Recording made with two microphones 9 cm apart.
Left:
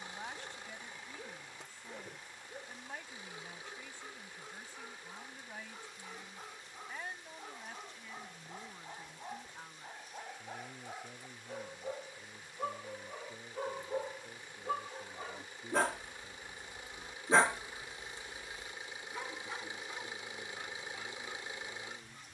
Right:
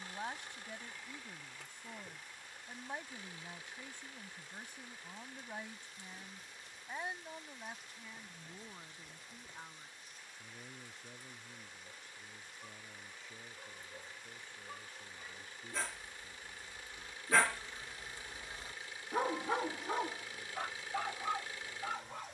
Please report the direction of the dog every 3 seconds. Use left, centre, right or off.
left, left, left, left, left, left, right, right.